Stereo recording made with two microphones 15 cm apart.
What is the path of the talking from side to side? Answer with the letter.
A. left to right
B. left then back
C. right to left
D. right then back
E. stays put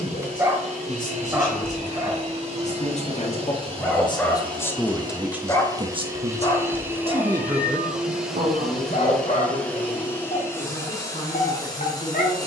D.